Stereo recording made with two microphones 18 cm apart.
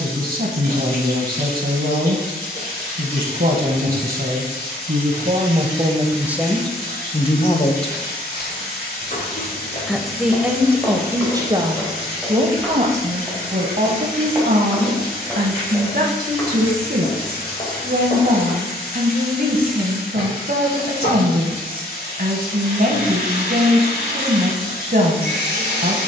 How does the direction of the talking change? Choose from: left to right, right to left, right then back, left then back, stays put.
left then back.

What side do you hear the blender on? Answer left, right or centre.
left.